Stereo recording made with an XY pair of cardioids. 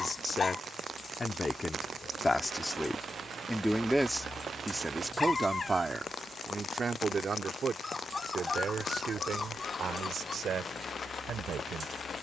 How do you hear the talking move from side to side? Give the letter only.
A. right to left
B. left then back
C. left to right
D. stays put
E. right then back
C.